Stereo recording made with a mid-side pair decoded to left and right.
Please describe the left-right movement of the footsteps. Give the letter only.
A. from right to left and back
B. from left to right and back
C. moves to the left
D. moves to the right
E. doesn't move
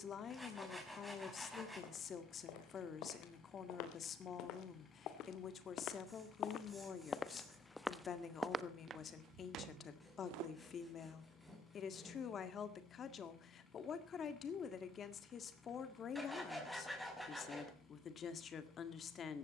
D.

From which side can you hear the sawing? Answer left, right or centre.
centre.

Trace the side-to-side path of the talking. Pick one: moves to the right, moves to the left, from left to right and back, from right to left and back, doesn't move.
doesn't move.